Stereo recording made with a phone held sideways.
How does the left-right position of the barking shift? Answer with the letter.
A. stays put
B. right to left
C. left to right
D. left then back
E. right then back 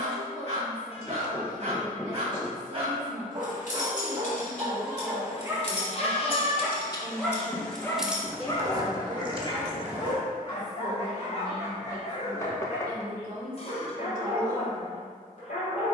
B.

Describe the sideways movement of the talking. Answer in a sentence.
You can hear the talking travel towards the right.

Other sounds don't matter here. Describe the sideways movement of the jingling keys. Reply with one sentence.
In this clip you hear the jingling keys move to the right.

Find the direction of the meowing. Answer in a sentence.
You can hear the meowing on the left.